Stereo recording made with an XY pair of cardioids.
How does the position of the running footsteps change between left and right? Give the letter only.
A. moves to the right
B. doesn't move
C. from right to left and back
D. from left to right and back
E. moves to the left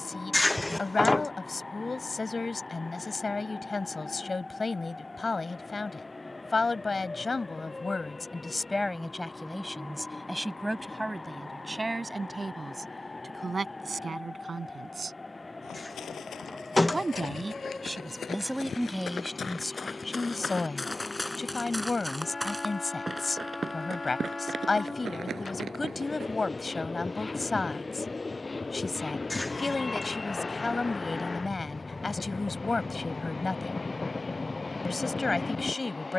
A.